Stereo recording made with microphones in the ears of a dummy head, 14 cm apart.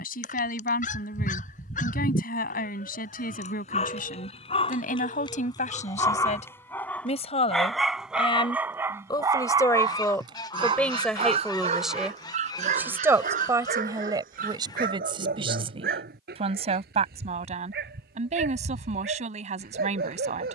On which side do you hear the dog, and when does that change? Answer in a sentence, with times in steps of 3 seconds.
In this clip you hear the dog on the left from 0 s, in the centre from 6 s and on the right from 9 s.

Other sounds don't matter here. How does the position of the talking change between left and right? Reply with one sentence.
You can hear the talking move to the right.